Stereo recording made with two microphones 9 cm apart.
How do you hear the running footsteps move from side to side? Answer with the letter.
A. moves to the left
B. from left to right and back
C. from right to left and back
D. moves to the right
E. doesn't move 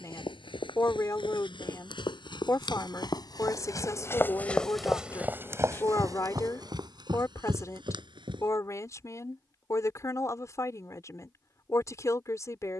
D.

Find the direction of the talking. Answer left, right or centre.
left.